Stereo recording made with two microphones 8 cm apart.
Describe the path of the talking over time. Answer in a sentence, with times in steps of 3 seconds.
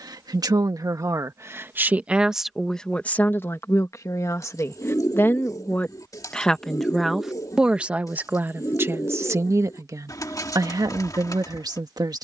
In this clip you hear the talking on the right from 0 s, on the left from 3 s, in the centre from 6 s and on the right from 9 s.